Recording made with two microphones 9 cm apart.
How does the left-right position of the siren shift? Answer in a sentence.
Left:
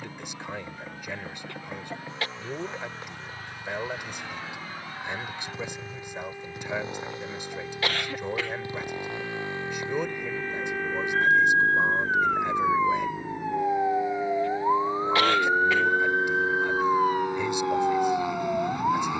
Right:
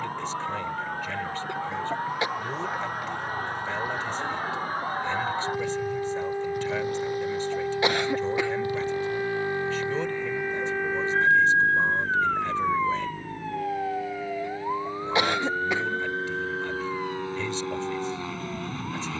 In this clip you hear the siren move to the left.